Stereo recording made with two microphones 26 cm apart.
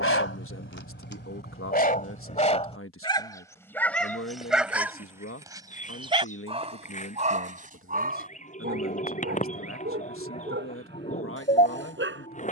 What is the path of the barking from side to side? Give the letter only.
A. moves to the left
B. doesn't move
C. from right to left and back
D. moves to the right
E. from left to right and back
D.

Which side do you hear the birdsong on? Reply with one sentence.
You can hear the birdsong on the left.